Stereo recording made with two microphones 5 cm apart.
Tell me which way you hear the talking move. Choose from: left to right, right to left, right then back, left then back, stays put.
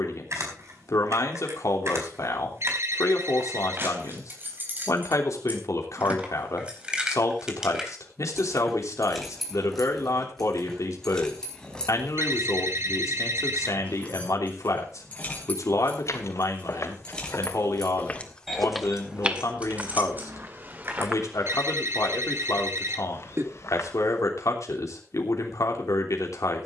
stays put.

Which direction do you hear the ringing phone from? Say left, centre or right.
right.